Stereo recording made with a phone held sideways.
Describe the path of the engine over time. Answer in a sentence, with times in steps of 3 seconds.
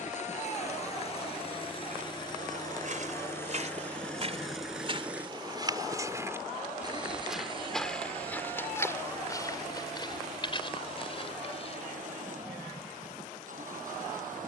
In this clip you hear the engine on the left from 0 s, in the centre from 3 s and on the right from 6 s.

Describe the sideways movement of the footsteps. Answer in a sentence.
You can hear the footsteps go from the right side to the left.